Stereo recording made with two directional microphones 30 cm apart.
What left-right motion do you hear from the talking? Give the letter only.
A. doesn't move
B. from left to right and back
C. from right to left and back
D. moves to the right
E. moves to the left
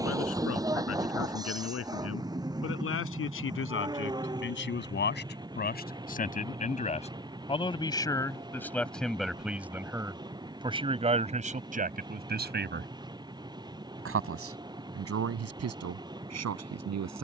D.